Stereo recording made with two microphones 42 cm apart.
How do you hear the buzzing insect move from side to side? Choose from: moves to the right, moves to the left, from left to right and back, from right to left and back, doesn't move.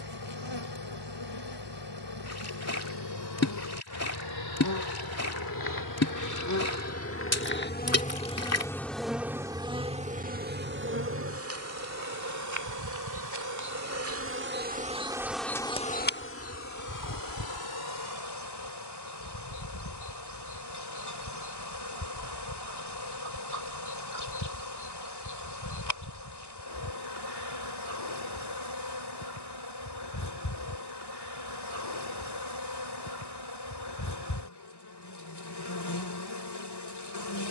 from left to right and back.